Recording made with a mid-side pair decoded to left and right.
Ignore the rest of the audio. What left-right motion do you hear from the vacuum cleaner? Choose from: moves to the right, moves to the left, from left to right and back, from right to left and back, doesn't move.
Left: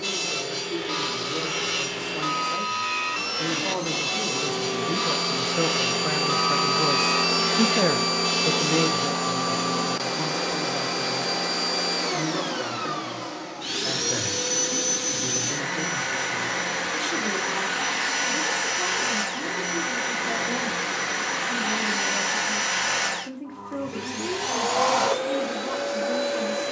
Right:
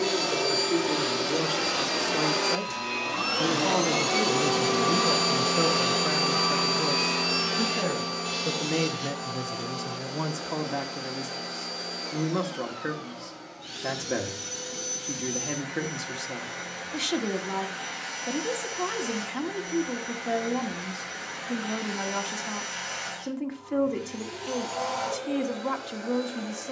moves to the left.